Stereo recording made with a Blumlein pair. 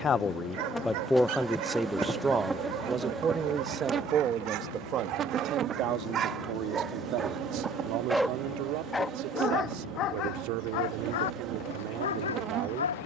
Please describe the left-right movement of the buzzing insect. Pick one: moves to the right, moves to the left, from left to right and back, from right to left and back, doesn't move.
moves to the right.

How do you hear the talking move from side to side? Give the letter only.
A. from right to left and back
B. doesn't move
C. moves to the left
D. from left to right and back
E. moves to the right
E.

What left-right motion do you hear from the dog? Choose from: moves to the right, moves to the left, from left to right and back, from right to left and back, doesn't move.
moves to the left.